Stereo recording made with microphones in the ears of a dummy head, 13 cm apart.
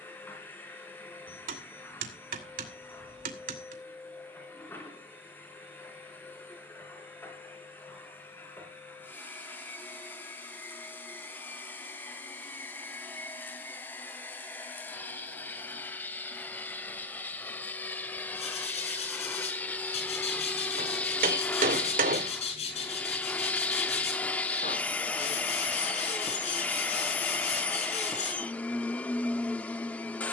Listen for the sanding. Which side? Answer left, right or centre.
left.